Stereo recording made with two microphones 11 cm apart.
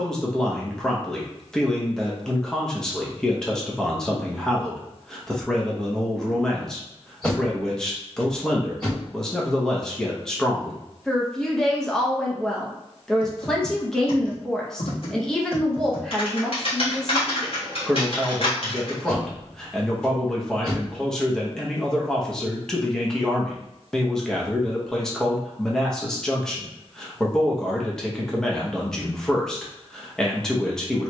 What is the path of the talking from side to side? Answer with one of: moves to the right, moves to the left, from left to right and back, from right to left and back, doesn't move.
doesn't move.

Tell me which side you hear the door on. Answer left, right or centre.
centre.